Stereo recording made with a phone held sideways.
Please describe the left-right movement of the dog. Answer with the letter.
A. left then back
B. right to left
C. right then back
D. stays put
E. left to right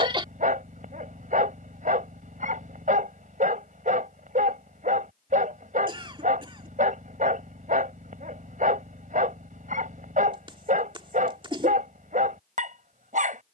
D.